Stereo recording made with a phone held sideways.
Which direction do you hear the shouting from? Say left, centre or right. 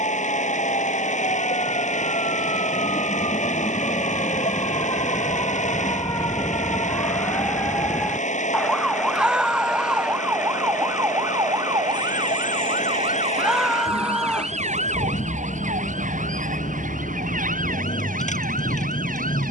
centre.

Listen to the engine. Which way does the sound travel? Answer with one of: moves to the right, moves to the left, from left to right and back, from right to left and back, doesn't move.
doesn't move.